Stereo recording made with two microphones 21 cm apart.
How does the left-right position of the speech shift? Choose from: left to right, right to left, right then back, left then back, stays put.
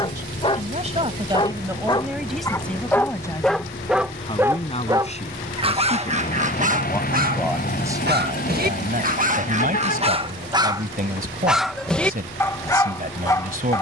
left then back.